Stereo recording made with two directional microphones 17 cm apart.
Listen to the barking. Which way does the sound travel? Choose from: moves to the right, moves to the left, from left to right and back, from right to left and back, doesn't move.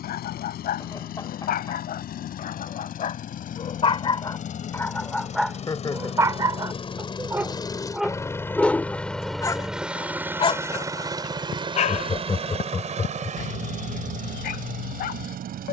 from left to right and back.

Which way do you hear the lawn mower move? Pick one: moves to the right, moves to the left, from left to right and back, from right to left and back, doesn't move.
moves to the right.